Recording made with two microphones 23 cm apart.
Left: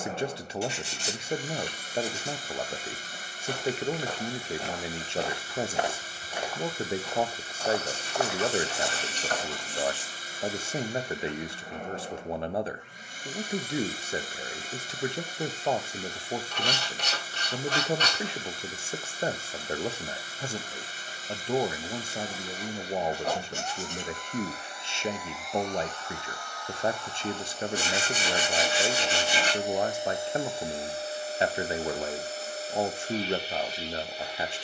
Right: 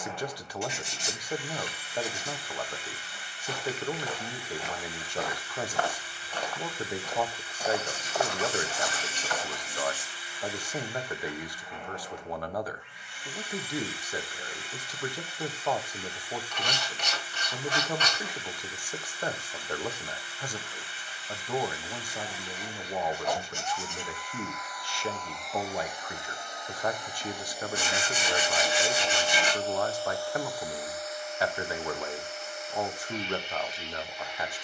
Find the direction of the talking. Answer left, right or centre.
left.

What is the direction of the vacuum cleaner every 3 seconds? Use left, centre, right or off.
left, left, left, left, left, left, left, left, centre, centre, left, left.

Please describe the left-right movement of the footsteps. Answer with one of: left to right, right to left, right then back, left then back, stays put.
right then back.